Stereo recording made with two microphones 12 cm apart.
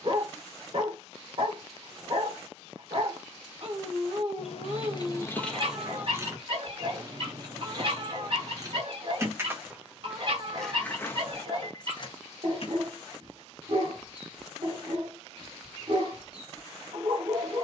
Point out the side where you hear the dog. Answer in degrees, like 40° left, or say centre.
50° right.